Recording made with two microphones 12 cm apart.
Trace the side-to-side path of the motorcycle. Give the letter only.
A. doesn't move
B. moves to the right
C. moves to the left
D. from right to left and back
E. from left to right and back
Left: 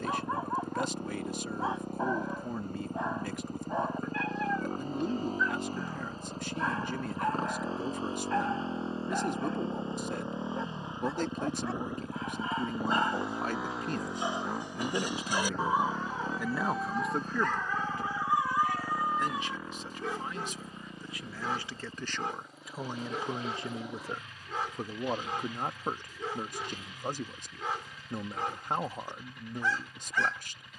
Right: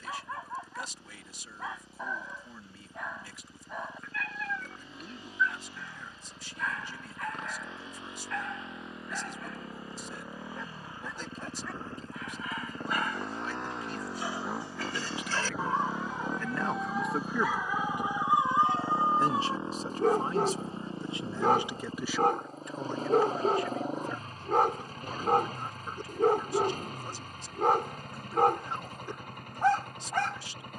B.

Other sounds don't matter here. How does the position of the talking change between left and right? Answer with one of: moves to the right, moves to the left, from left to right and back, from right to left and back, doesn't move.
from left to right and back.